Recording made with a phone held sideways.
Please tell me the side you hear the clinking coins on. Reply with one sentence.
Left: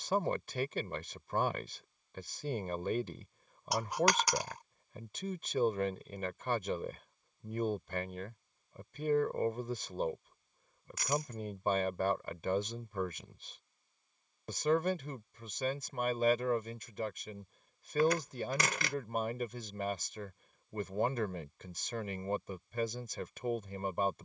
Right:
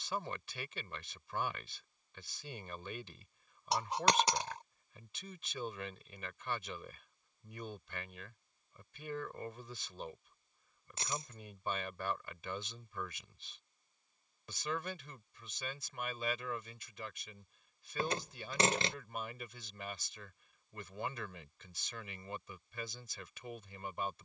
You can hear the clinking coins on the right.